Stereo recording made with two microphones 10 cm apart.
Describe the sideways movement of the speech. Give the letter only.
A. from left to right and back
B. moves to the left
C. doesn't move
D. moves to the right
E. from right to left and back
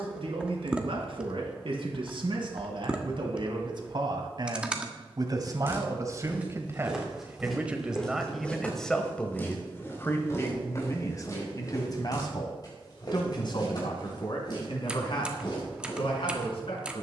B.